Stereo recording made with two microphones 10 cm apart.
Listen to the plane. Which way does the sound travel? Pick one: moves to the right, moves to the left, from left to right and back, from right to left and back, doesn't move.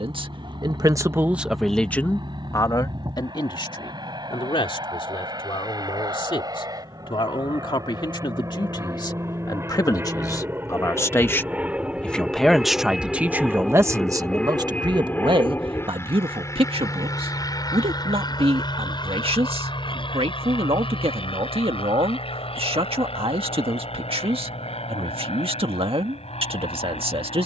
moves to the left.